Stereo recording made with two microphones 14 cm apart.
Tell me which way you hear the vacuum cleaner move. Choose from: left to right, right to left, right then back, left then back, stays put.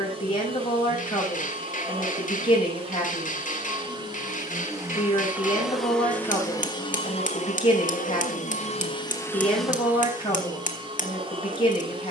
left then back.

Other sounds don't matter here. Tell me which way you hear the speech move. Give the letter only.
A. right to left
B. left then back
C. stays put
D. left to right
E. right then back
C.